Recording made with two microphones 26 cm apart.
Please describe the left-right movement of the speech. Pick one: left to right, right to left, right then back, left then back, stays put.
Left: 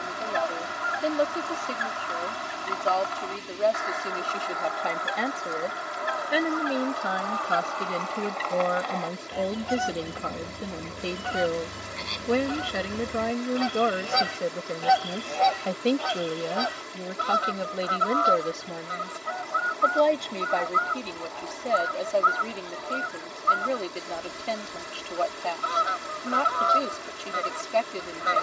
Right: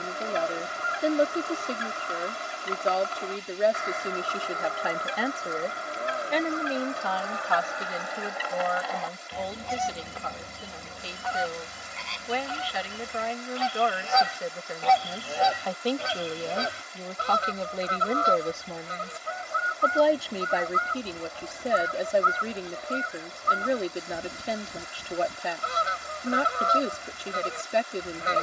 left then back.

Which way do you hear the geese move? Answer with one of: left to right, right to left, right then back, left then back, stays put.
left then back.